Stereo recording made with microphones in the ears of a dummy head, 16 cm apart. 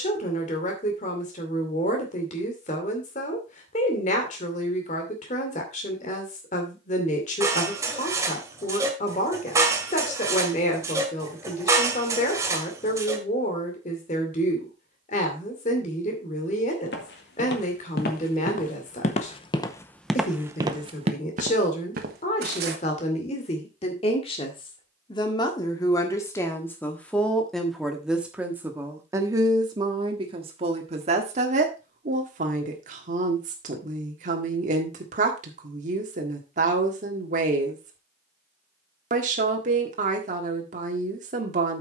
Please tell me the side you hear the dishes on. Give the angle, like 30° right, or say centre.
20° right.